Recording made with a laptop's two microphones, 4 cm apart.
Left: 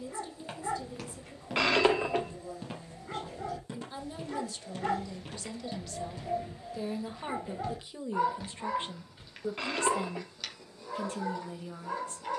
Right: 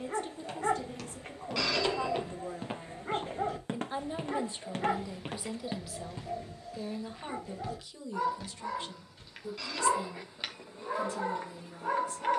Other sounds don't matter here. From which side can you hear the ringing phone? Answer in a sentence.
You can hear the ringing phone on the left.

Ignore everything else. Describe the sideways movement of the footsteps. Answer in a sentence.
You can hear the footsteps move from left to right and back again.